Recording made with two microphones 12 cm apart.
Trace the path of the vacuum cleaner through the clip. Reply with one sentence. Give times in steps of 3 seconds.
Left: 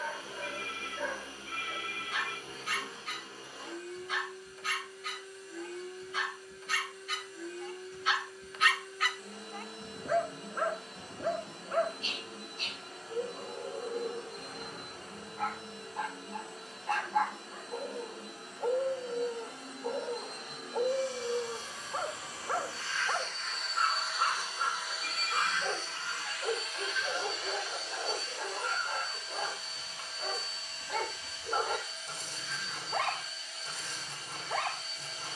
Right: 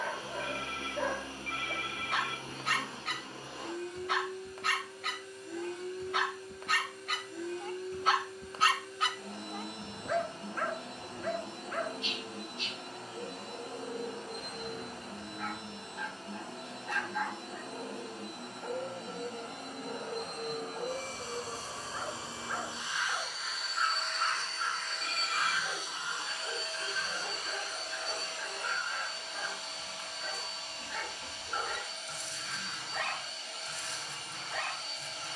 In this clip you hear the vacuum cleaner on the right from 0 s, in the centre from 24 s and on the right from 27 s.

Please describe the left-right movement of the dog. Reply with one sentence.
You can hear the dog move to the left.